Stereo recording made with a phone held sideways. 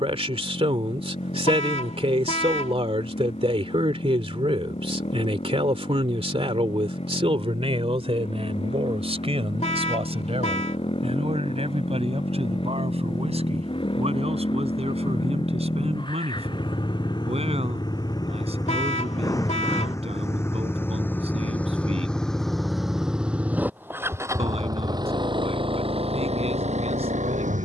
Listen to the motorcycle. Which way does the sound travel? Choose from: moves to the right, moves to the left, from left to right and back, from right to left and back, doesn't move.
moves to the right.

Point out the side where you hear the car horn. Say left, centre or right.
left.